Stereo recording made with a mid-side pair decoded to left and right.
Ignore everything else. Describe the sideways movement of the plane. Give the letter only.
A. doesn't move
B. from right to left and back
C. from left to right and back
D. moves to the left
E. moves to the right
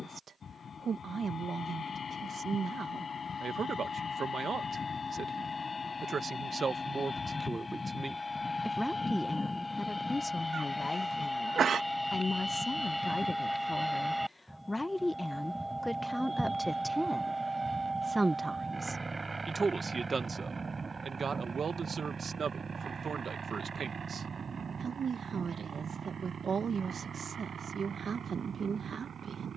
E.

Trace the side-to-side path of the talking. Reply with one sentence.
You can hear the talking go left and come back.